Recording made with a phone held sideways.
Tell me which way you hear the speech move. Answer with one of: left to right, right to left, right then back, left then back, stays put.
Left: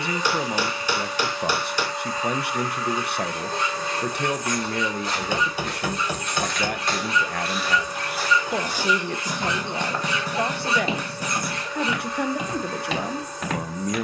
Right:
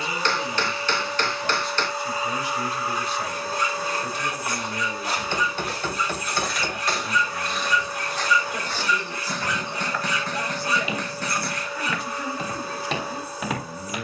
stays put.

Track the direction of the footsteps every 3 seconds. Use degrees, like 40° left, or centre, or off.
off, 10° right, centre, 20° left, centre.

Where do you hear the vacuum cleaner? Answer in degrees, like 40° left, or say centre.
10° right.